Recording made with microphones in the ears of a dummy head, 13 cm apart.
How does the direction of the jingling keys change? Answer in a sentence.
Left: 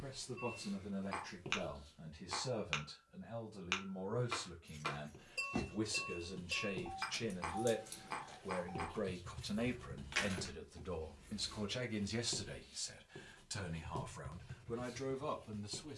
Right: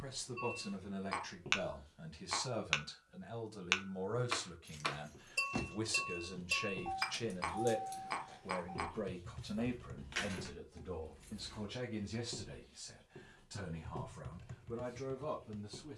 In this clip you hear the jingling keys move from right to left and back again.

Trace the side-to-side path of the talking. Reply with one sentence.
You can hear the talking travel towards the left.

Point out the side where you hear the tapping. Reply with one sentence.
In this clip you hear the tapping on the right.